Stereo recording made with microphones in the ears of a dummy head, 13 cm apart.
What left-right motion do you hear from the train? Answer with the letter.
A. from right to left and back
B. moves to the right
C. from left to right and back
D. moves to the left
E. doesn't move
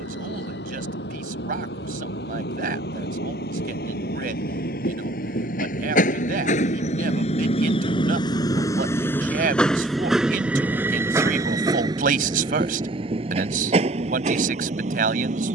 B.